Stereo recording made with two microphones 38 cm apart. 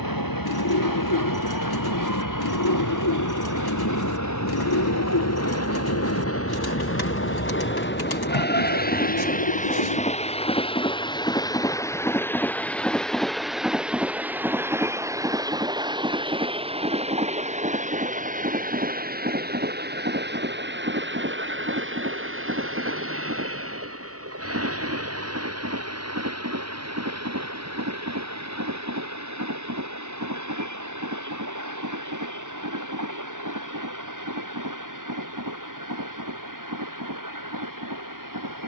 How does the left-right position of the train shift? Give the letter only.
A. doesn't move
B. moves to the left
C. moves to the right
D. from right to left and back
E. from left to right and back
C.